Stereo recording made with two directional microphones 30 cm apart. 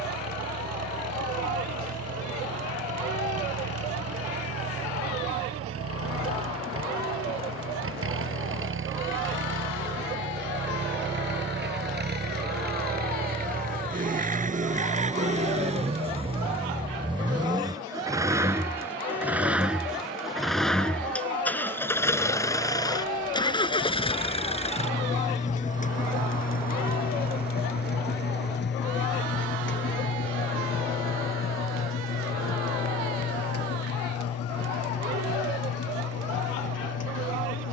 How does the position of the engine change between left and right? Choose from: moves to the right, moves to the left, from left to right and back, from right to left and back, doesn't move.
moves to the left.